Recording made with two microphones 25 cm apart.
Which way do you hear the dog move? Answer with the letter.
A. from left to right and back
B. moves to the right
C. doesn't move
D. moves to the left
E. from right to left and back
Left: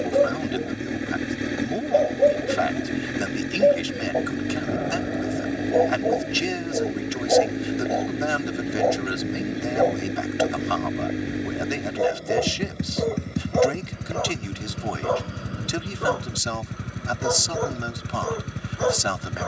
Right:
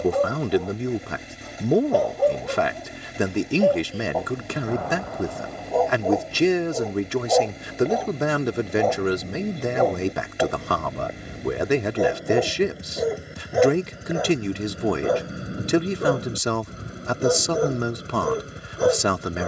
B.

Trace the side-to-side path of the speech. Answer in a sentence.
In this clip you hear the speech stay in one place.